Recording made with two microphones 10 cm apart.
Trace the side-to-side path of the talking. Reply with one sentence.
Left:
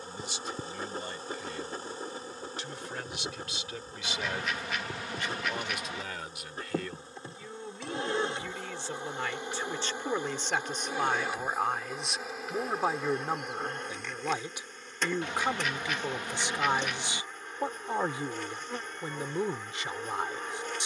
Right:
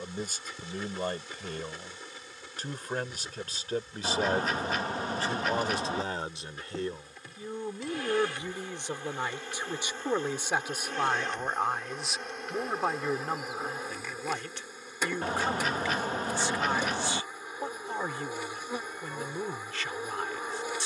In this clip you hear the talking travel towards the left.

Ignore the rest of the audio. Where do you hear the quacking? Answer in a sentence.
In this clip you hear the quacking on the right.